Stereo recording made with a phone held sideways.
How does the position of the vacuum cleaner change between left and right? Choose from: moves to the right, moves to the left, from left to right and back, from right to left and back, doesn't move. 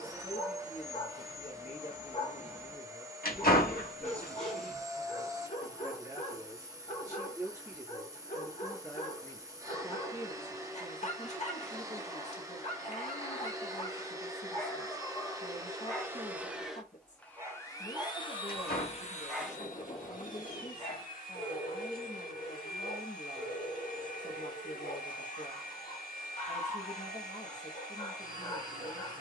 moves to the left.